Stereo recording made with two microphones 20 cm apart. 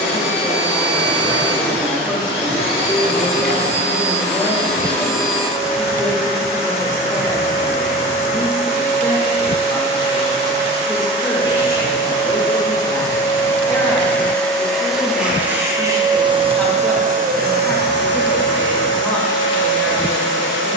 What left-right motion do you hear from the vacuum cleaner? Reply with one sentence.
In this clip you hear the vacuum cleaner travel towards the right.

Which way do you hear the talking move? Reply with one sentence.
In this clip you hear the talking stay in one place.